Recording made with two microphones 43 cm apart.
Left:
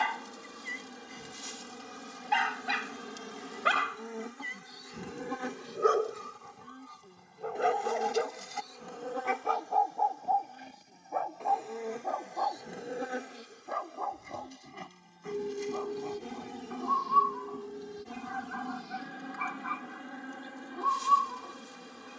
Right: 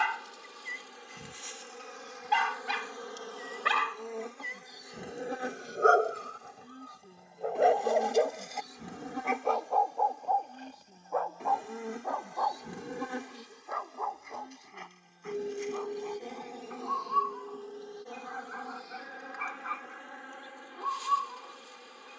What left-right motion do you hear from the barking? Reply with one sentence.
In this clip you hear the barking travel towards the left.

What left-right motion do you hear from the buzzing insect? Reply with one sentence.
In this clip you hear the buzzing insect go right and come back.